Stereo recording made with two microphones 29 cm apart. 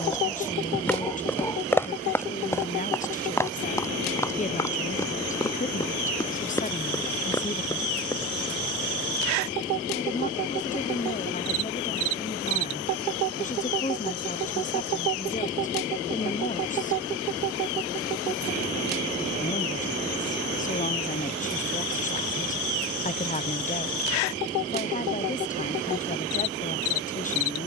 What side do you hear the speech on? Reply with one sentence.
In this clip you hear the speech on the left.